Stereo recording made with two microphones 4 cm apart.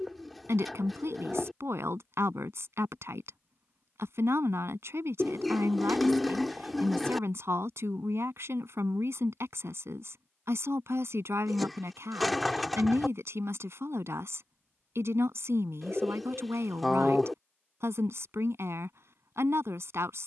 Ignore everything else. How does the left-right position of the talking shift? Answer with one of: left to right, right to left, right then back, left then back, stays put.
stays put.